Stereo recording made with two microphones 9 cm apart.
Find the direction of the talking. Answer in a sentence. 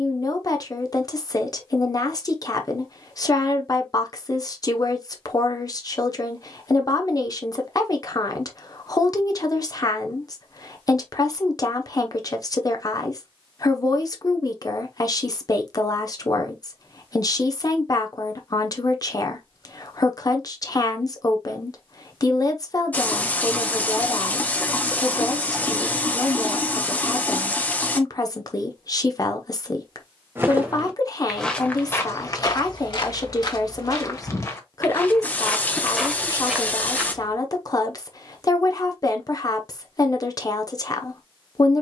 You can hear the talking on the left.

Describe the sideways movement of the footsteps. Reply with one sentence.
You can hear the footsteps move from right to left and back again.